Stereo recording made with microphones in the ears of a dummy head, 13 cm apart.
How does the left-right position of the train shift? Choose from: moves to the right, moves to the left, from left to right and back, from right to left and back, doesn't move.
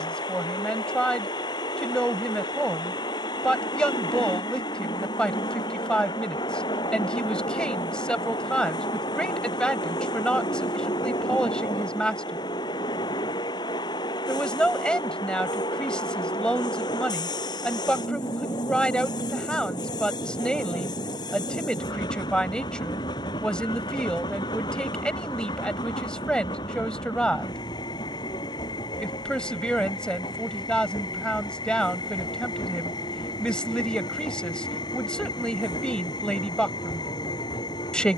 doesn't move.